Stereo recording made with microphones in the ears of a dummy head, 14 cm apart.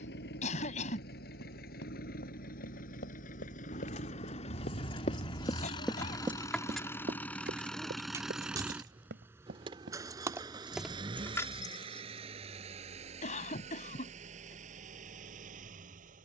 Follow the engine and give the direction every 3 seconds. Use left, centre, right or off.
left, left, centre, right, right, right.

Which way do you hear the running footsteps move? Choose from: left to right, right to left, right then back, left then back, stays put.
left to right.